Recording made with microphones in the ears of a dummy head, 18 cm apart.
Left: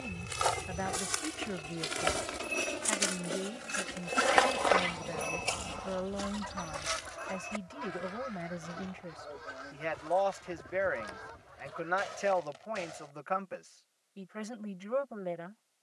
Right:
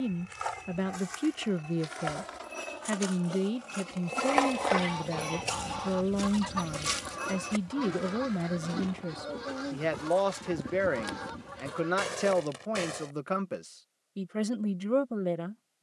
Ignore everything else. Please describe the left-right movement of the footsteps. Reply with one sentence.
You can hear the footsteps move from left to right.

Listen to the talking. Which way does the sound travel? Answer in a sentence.
You can hear the talking stay put.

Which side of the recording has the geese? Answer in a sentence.
In this clip you hear the geese on the right.